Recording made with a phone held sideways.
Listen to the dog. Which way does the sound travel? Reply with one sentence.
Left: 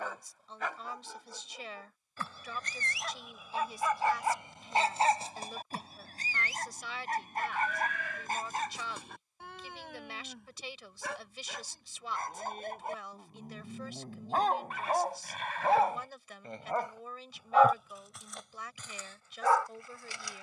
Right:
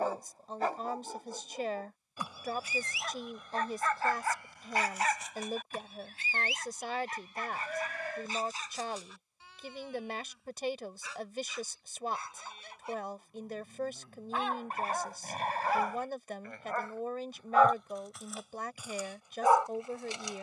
In this clip you hear the dog move from right to left and back again.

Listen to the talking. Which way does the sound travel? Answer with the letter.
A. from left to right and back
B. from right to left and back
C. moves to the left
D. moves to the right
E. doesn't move
E.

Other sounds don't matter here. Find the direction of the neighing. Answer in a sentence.
In this clip you hear the neighing on the right.